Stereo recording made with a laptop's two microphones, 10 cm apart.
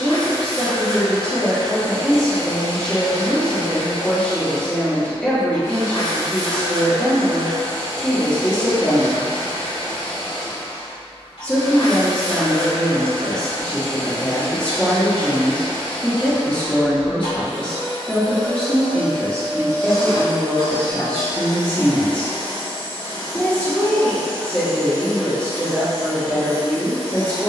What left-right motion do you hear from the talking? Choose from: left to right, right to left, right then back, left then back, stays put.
stays put.